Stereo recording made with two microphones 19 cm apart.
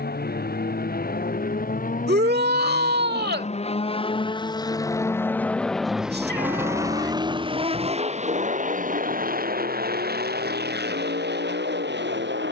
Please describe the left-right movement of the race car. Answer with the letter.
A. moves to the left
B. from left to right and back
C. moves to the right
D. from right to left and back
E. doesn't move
C.